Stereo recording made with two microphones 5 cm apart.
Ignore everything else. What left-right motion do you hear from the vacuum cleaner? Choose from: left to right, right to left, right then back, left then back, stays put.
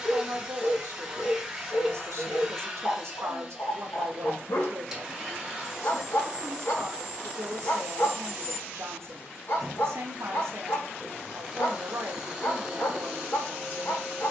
stays put.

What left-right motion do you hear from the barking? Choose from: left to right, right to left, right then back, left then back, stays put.
stays put.